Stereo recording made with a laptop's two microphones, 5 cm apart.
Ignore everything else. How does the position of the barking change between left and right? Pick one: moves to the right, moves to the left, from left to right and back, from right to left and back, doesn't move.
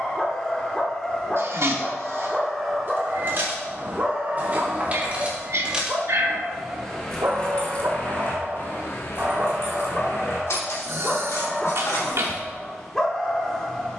from left to right and back.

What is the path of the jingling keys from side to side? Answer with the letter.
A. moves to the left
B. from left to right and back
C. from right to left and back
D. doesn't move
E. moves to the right
A.